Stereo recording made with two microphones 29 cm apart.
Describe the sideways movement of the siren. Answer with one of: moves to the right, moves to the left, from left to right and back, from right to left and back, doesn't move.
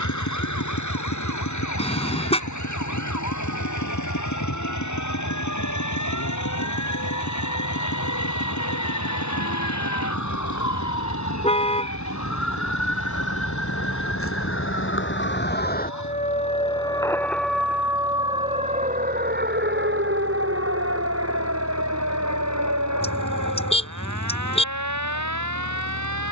moves to the right.